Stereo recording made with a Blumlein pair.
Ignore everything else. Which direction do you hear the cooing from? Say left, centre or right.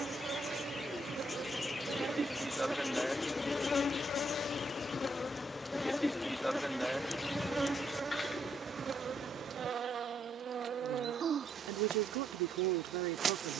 centre.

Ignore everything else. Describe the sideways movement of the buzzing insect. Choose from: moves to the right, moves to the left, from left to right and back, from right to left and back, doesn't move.
from right to left and back.